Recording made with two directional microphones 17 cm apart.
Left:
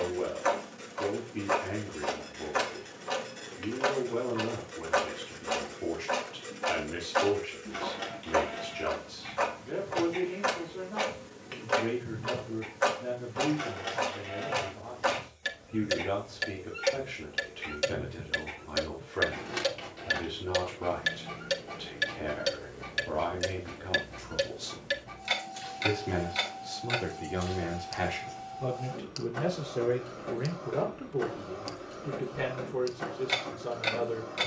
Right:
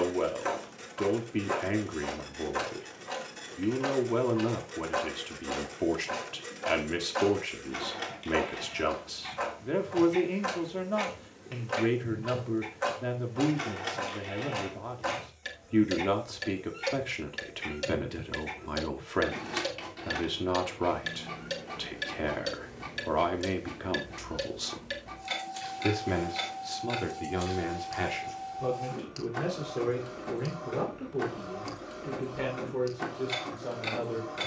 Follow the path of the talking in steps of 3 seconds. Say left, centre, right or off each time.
right, right, right, right, right, right, right, right, right, centre, centre, centre.